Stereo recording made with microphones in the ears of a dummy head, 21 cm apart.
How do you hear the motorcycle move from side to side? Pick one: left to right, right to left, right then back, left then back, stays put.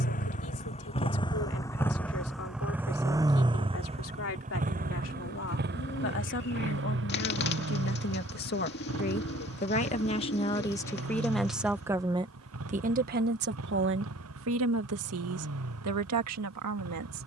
left to right.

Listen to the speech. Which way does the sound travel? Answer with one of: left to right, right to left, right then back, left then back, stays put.
left to right.